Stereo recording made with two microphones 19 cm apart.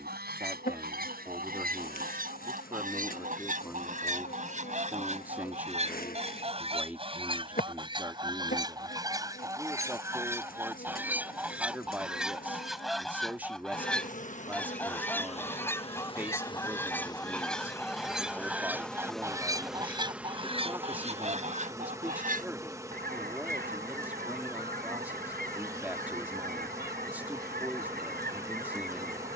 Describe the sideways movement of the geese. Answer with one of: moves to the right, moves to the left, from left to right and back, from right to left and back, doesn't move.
from right to left and back.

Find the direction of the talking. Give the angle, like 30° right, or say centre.
10° right.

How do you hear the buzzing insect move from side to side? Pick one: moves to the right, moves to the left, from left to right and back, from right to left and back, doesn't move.
moves to the right.